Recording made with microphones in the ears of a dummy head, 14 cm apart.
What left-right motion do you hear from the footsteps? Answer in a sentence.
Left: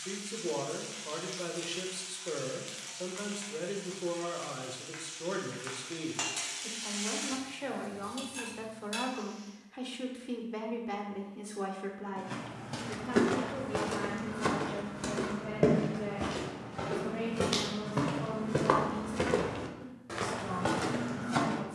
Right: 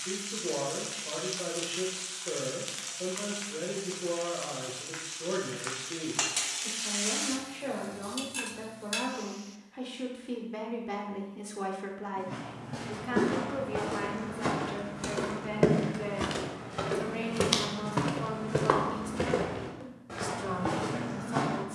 You can hear the footsteps move from left to right and back again.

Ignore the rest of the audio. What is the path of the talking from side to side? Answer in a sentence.
In this clip you hear the talking travel towards the right.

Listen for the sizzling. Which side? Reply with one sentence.
In this clip you hear the sizzling on the right.